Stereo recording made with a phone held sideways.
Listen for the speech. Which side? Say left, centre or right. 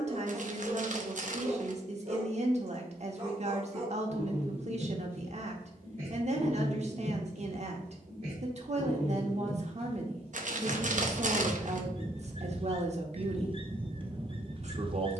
right.